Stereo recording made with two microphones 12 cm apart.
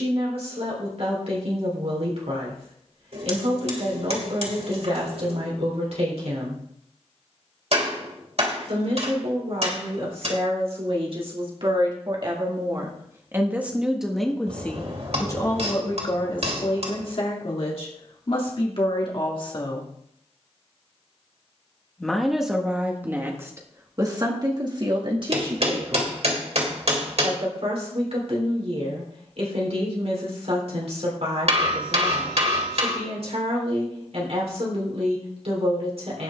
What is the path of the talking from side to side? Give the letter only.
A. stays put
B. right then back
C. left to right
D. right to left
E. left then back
E.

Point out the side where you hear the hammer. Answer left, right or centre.
right.